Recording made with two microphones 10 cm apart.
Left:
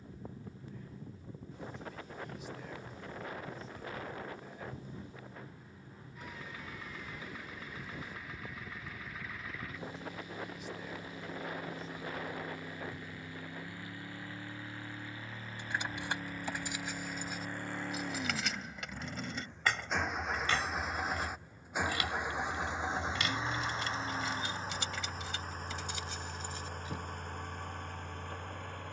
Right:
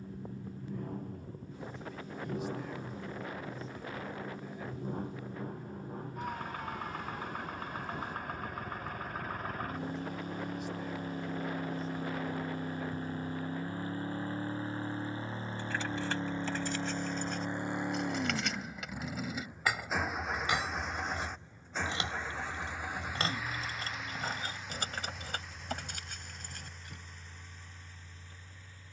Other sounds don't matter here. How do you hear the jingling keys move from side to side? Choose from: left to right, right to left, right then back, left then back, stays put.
left to right.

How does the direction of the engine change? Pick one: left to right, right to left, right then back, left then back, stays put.
right to left.